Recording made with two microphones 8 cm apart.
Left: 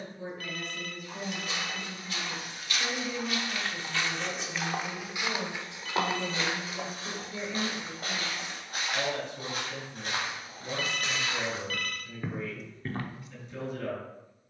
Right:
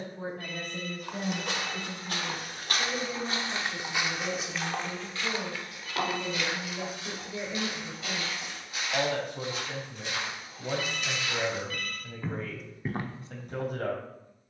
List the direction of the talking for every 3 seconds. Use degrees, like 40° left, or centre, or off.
40° right, centre, 10° right, 60° right, 60° right.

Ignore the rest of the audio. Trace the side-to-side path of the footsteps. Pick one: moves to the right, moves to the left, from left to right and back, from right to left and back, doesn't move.
from right to left and back.